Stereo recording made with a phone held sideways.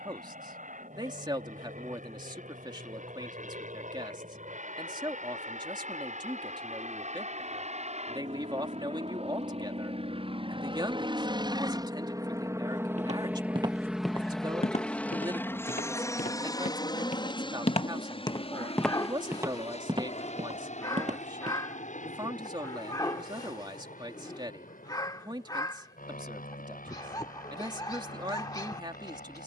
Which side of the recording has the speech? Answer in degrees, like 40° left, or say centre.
30° right.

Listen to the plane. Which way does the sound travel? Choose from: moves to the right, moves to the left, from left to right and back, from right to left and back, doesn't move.
moves to the left.